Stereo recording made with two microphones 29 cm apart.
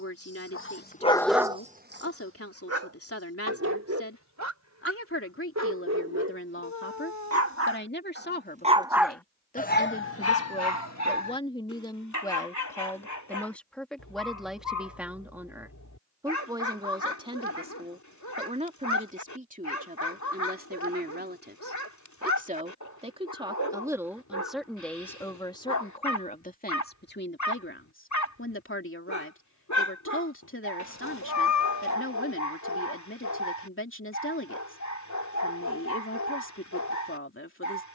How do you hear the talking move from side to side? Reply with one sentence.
In this clip you hear the talking move from left to right and back again.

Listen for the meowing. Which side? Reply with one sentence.
You can hear the meowing on the left.